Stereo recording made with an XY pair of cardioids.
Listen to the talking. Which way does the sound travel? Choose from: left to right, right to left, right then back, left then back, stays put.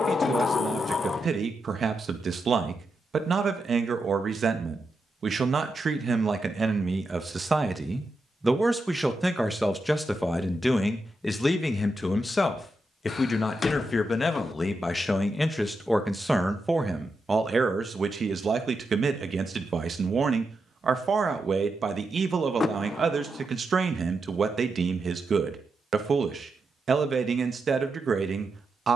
left then back.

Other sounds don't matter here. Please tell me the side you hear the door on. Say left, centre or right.
left.